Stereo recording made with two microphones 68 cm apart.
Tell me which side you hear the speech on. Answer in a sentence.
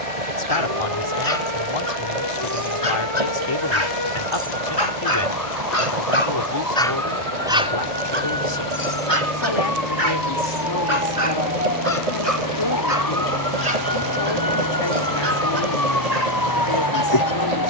You can hear the speech on the left.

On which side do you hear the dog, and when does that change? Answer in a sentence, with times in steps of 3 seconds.
You can hear the dog on the left from 0 s, in the centre from 6 s and on the right from 9 s.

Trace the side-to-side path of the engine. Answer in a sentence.
In this clip you hear the engine stay put.